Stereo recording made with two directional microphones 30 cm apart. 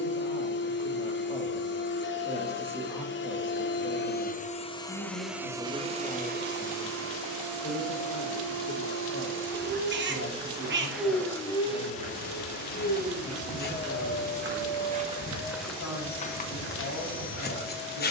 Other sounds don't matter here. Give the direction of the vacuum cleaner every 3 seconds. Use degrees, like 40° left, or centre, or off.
40° left, 20° left, 50° right, 10° right, 30° left, 30° left.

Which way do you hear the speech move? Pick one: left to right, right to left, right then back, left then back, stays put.
right to left.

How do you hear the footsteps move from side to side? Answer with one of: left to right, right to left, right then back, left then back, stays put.
right to left.